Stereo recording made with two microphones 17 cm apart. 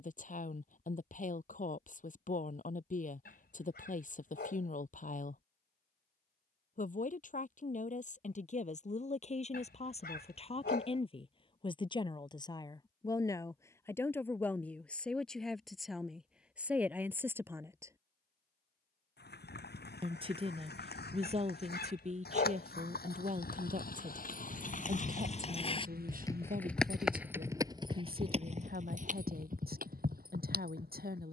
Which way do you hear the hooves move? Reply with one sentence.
You can hear the hooves travel towards the right.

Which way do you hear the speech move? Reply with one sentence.
You can hear the speech travel towards the right.